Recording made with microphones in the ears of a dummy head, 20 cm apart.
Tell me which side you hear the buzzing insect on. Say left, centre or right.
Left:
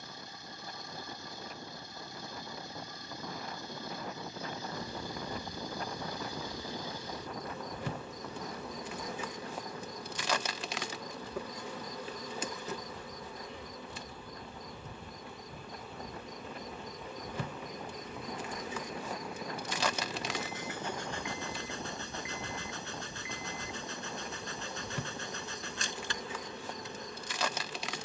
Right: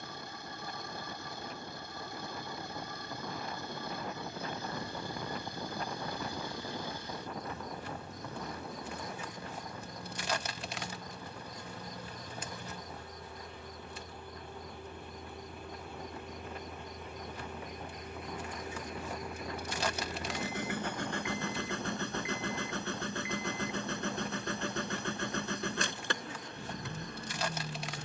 left.